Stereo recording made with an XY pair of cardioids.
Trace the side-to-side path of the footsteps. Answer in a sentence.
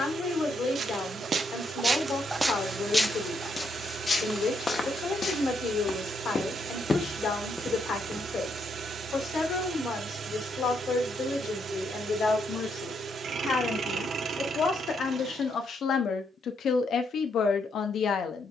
You can hear the footsteps go left and come back.